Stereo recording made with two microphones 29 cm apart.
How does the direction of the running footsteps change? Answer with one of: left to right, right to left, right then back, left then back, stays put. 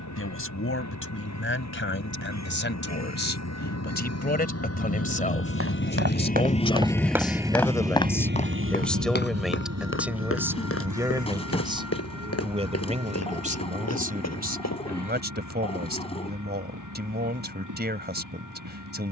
right to left.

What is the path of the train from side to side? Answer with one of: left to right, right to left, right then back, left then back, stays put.
left to right.